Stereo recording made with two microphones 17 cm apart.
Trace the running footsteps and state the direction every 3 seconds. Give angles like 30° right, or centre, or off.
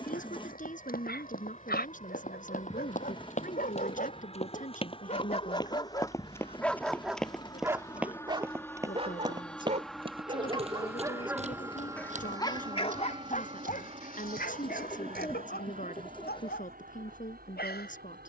60° left, 40° left, centre, 40° right, 50° right, 60° right.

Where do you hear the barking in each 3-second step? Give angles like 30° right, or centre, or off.
70° left, 40° left, 10° right, 30° right, 50° left, 80° left.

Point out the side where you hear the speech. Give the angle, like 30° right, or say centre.
50° left.